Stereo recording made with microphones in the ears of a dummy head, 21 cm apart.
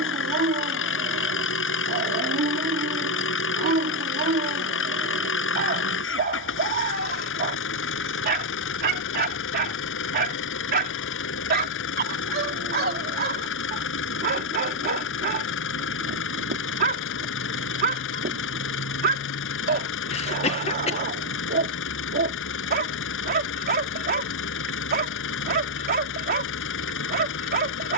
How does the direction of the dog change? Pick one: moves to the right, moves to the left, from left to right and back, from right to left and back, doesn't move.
doesn't move.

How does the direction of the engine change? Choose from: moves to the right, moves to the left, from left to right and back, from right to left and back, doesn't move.
doesn't move.